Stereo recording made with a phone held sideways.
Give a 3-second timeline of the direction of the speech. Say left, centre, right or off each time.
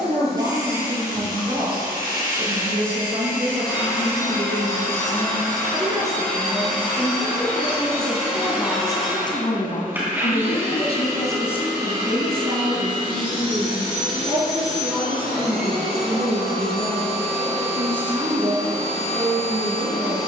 right, right, centre, left, right, right, right.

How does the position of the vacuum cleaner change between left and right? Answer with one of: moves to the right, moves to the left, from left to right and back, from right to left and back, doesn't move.
moves to the right.